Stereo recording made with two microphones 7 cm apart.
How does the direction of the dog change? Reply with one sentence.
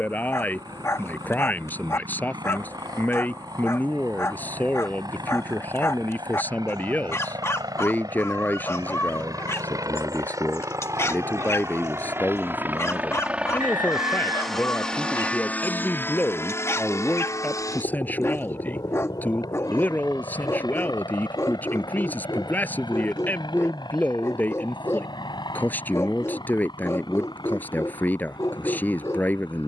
You can hear the dog stay put.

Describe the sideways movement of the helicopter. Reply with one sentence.
In this clip you hear the helicopter go from the right side to the left.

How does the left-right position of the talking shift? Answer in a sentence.
In this clip you hear the talking stay put.